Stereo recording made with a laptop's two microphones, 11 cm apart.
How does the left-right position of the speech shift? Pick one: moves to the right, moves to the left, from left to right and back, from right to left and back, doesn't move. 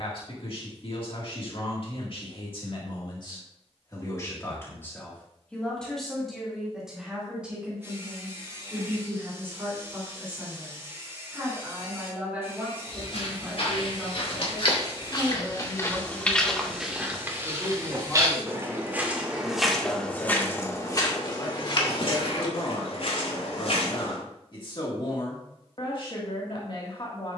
from left to right and back.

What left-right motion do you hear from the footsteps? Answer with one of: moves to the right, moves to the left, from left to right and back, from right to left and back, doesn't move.
from left to right and back.